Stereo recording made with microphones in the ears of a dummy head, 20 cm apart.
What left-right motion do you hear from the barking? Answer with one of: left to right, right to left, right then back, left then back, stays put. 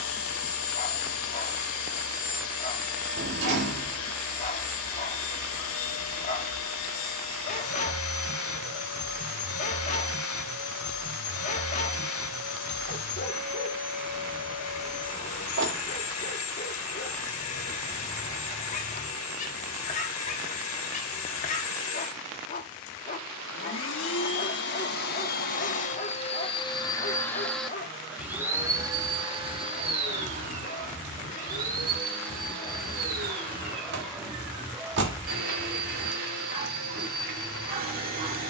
left to right.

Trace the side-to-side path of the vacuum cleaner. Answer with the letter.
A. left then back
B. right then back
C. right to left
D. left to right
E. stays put
D.